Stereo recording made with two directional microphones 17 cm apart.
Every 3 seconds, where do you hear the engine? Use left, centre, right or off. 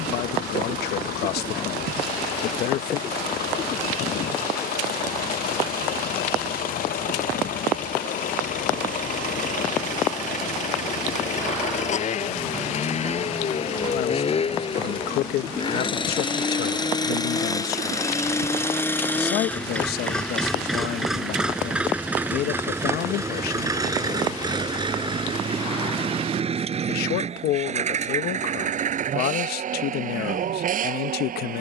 left, left, left, left, left, left, centre, centre, right, right, right.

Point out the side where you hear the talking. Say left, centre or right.
left.